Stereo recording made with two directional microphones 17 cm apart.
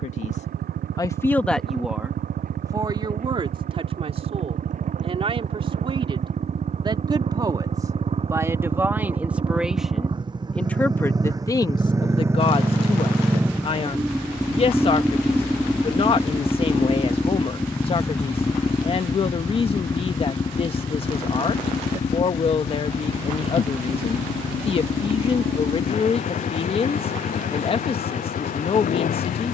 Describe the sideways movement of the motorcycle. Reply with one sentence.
You can hear the motorcycle go from the right side to the left.